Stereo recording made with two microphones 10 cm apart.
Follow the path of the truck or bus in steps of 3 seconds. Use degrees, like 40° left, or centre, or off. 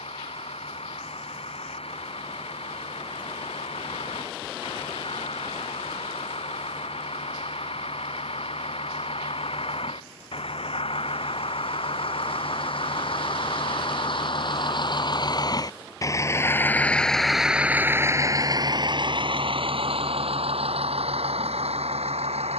80° left, 70° left, 70° left, 70° left, 60° left, 20° left, 50° right, 80° right.